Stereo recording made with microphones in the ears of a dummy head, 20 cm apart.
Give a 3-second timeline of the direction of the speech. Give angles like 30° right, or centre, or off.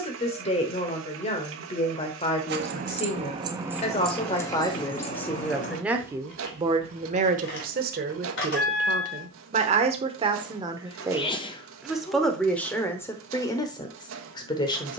30° left, 20° left, 40° right, 20° right, 10° left.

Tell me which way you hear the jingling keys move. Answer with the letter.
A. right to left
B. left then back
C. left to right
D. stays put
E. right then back
A.